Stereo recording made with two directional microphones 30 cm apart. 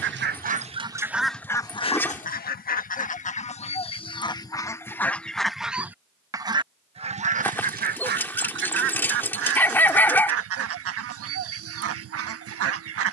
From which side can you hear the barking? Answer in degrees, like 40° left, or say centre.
10° left.